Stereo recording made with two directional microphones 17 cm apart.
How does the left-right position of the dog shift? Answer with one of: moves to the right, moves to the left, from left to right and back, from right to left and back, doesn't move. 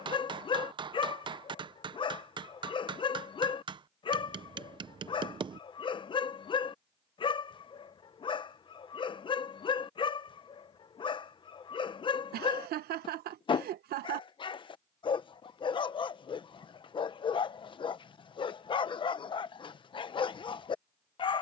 doesn't move.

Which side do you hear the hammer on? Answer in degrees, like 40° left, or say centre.
30° right.